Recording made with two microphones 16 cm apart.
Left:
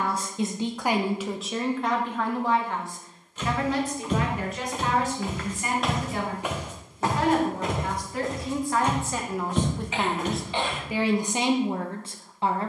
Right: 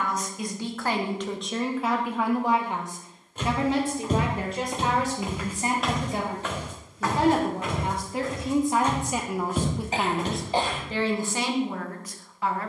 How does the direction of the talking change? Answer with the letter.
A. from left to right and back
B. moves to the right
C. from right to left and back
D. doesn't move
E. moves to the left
A.